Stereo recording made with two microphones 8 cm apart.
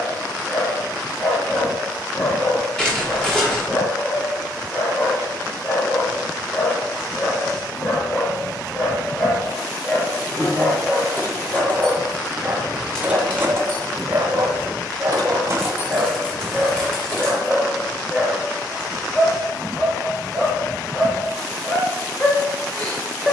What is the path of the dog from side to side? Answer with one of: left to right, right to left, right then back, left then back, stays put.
right then back.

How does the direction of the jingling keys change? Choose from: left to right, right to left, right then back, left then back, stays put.
right then back.